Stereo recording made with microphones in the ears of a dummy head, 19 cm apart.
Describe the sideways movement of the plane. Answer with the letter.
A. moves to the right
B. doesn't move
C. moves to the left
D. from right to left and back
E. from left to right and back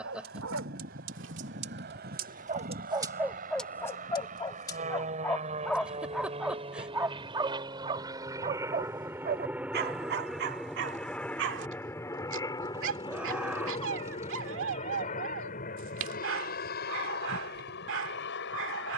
C.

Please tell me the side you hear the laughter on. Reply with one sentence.
You can hear the laughter in the centre.